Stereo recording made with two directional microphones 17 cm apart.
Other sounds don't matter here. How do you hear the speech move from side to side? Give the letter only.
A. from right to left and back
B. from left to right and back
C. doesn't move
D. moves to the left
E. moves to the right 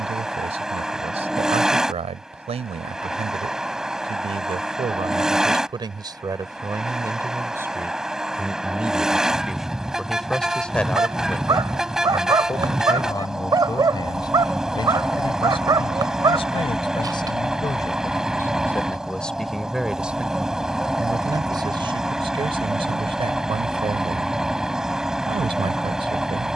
A.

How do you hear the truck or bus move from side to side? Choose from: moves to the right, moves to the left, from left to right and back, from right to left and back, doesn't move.
doesn't move.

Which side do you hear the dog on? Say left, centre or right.
right.